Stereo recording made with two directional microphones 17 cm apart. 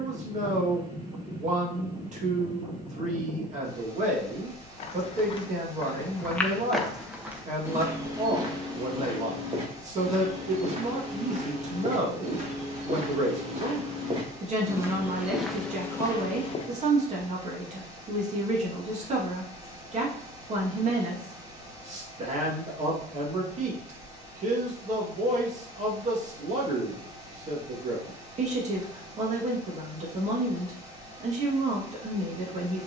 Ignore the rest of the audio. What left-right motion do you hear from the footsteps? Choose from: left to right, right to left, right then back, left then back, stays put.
right then back.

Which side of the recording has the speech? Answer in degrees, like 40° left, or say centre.
40° right.